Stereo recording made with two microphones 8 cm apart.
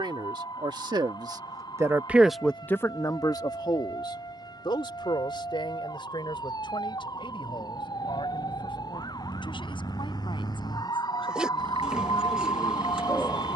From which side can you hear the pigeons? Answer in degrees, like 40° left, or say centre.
10° right.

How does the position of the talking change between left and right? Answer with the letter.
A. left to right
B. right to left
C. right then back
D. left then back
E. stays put
B.